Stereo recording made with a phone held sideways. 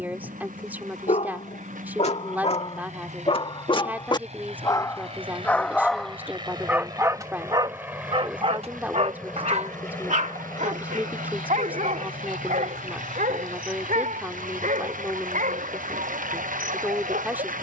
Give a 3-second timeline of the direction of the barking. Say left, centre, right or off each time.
left, left, right, right, right, right.